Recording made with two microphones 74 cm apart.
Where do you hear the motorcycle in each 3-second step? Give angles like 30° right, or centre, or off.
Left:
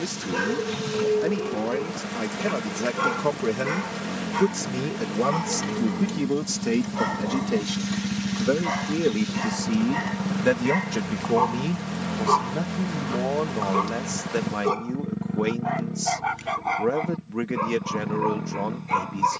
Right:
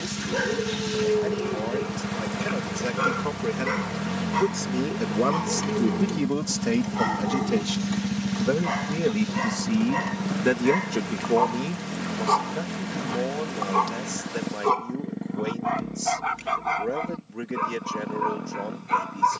50° right, 30° right, 10° right, 10° left, 30° left, 40° left, 50° left.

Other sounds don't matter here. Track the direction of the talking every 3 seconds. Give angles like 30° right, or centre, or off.
80° left, 40° left, 20° right, 10° left, 70° left, 80° left, 80° left.